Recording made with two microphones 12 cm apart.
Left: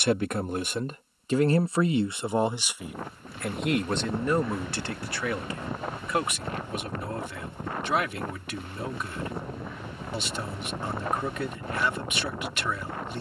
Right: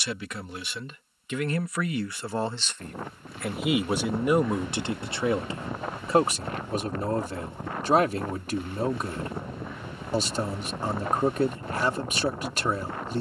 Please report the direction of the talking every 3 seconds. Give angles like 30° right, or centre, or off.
30° left, 20° right, 40° right, 40° right, 40° right.